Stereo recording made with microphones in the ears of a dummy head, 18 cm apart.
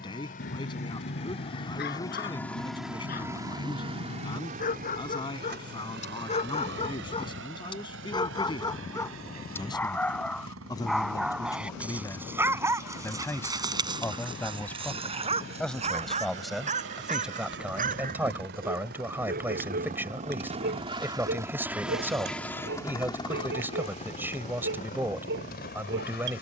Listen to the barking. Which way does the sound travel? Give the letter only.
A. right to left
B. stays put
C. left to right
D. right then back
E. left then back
C.